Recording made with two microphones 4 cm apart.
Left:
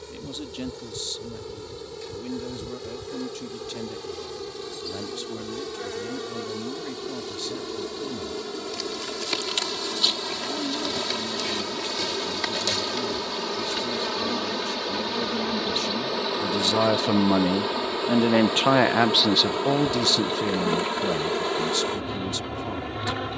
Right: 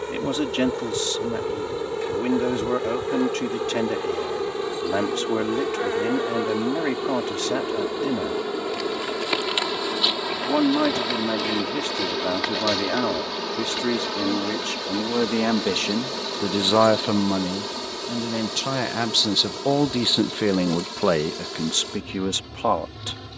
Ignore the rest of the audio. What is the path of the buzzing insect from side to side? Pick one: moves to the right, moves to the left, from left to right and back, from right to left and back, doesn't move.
moves to the left.